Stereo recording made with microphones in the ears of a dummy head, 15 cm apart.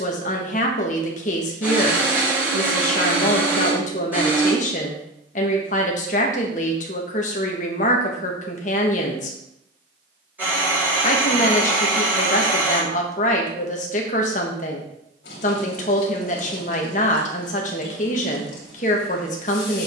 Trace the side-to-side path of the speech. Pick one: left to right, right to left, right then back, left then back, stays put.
stays put.